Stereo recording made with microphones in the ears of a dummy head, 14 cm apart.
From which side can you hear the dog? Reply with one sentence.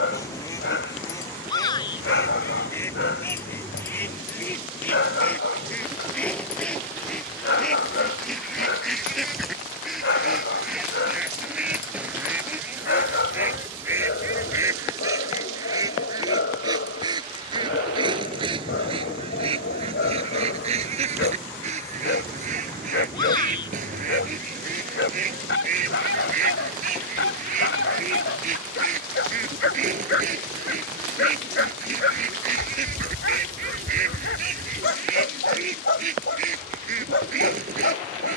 You can hear the dog on the left.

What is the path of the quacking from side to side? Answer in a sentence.
You can hear the quacking go from the left side to the right.